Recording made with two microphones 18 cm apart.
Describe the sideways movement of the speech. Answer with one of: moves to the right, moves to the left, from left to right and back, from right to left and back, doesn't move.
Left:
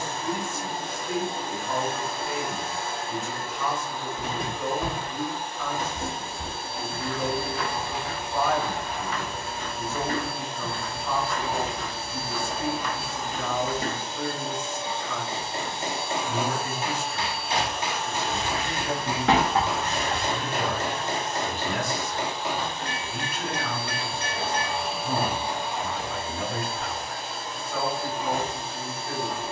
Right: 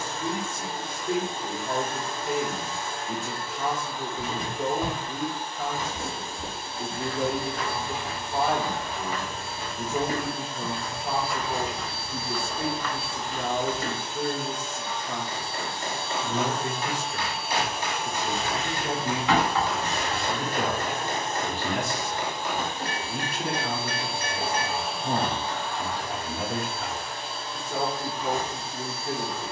doesn't move.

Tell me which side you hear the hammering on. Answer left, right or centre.
left.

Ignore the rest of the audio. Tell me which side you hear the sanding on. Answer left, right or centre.
left.